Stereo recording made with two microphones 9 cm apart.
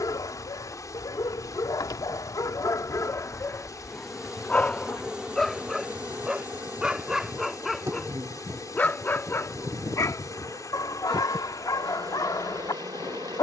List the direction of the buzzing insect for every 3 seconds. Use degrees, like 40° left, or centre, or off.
20° left, 10° right, 30° right, 50° right, 50° right.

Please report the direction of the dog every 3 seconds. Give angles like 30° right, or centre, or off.
50° left, 20° left, centre, 40° left, 50° left.